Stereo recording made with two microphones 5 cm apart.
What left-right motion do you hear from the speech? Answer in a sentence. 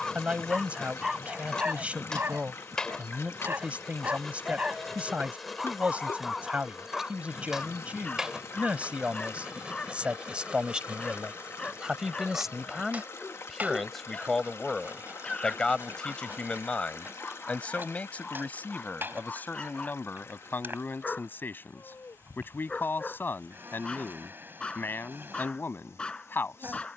In this clip you hear the speech move from right to left.